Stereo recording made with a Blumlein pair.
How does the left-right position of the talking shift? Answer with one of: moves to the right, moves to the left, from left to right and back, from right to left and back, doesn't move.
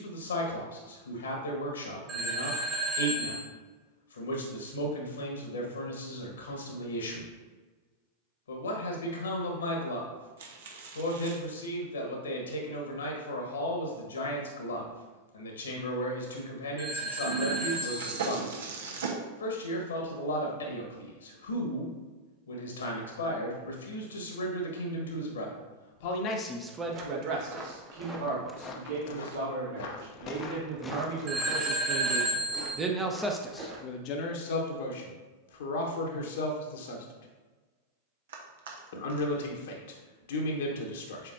from left to right and back.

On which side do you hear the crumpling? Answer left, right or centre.
right.